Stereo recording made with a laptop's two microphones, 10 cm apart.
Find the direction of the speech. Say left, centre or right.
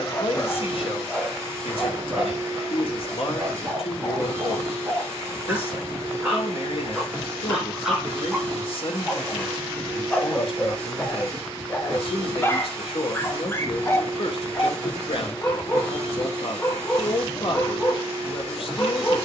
left.